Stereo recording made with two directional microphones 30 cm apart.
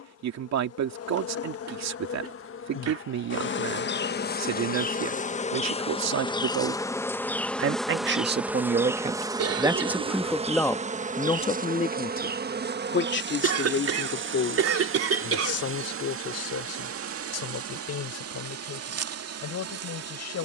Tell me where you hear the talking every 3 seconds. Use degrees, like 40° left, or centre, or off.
60° right, 60° right, 40° right, centre, 40° left, 50° left, 60° left.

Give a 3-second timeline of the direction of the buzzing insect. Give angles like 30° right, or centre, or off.
50° left, 30° left, centre, 20° right, 40° right, 50° right, 50° right.